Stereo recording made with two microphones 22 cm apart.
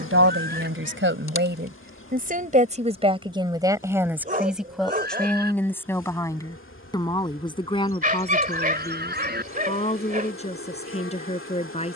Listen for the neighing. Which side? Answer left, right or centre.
right.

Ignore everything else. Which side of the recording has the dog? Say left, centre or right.
right.